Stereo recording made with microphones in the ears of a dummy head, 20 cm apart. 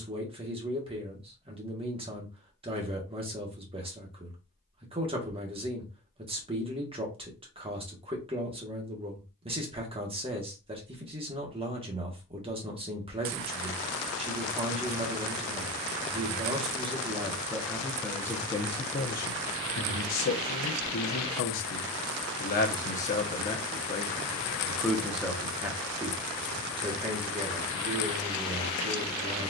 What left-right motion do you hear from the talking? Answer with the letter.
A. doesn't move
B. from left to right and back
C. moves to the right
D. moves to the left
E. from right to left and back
E.